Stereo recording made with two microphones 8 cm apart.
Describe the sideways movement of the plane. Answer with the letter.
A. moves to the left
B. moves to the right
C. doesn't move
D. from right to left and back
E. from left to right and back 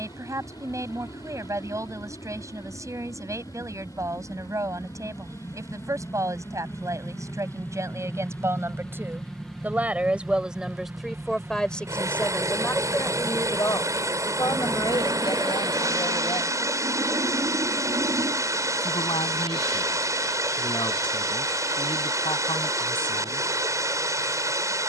B.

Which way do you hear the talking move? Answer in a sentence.
You can hear the talking travel towards the left.